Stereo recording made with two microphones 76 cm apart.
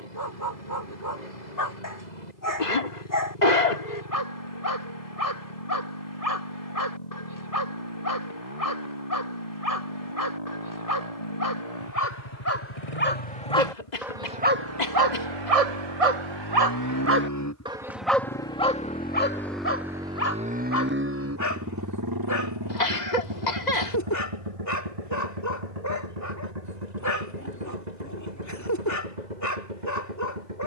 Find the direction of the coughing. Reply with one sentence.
In this clip you hear the coughing on the left.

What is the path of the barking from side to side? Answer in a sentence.
You can hear the barking go right and come back.